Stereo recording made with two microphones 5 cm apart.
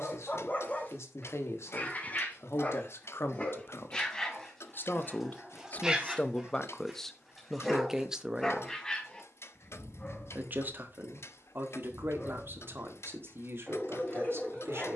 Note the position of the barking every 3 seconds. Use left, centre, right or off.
left, centre, centre, left, left.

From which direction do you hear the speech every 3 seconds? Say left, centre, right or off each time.
left, left, centre, right, right.